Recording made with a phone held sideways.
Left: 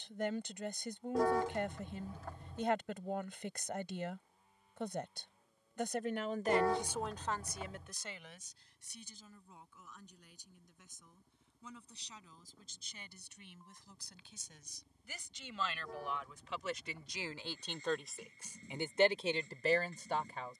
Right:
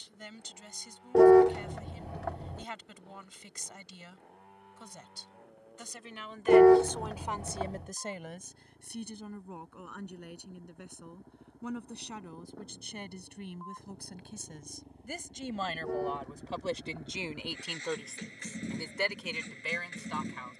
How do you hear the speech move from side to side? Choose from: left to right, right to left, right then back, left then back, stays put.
right then back.